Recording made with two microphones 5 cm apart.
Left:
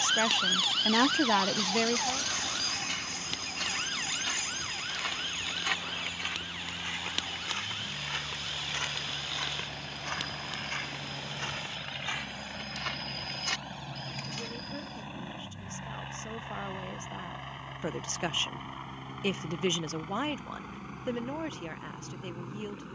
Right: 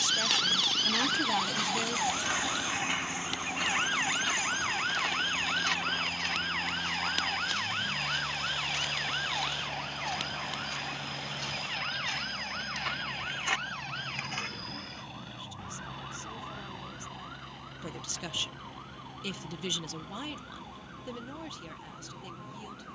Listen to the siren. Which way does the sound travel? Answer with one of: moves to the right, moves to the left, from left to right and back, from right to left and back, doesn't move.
moves to the right.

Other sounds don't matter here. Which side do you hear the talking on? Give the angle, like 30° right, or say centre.
40° left.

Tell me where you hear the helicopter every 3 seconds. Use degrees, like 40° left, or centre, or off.
50° right, 40° right, 20° right, 10° right, 10° left, 30° left, 40° left, 50° left.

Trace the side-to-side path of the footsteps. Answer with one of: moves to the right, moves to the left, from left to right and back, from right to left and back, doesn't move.
from right to left and back.